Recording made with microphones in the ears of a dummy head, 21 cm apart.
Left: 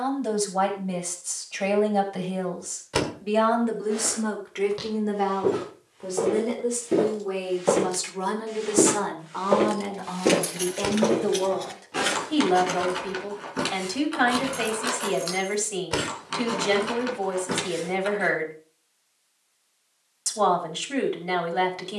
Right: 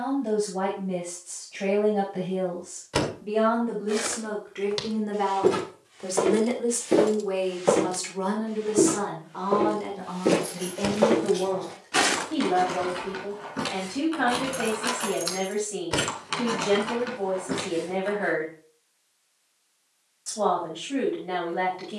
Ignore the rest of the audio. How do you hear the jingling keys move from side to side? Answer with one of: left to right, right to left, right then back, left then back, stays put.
right then back.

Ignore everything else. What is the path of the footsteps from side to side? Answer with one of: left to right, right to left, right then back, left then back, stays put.
left then back.